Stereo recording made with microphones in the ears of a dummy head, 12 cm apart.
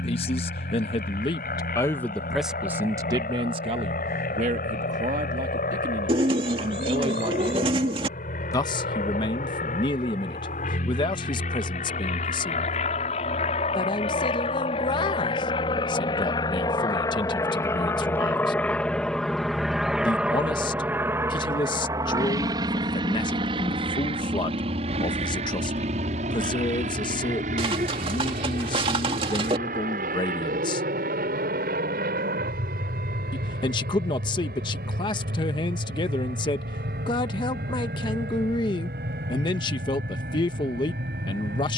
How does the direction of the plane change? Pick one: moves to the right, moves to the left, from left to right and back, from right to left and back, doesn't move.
moves to the right.